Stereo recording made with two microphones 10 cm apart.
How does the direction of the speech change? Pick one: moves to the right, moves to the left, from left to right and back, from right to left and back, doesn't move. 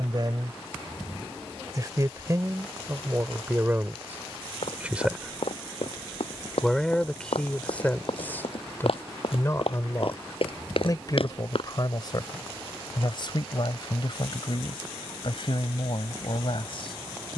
moves to the left.